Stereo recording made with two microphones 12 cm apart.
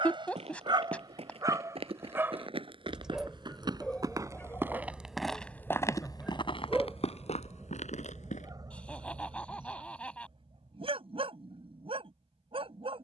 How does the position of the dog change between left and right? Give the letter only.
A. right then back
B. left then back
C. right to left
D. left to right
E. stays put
B.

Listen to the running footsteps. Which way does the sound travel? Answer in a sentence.
You can hear the running footsteps move to the left.